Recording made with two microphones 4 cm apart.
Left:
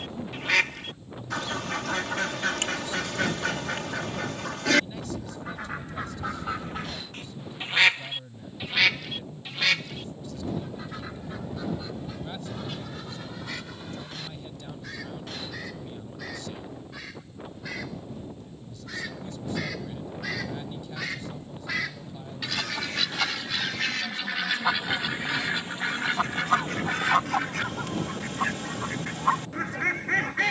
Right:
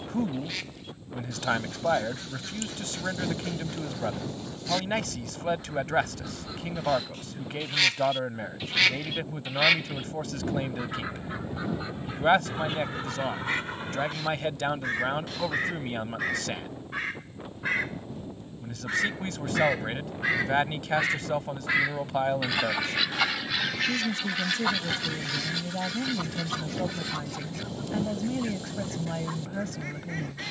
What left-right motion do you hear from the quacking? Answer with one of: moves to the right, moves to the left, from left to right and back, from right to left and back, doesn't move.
from left to right and back.